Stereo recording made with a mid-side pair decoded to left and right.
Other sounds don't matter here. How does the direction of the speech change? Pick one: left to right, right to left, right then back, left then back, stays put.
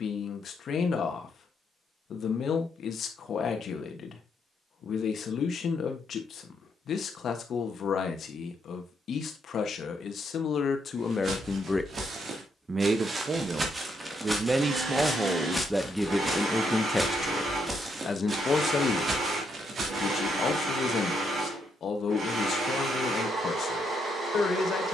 right then back.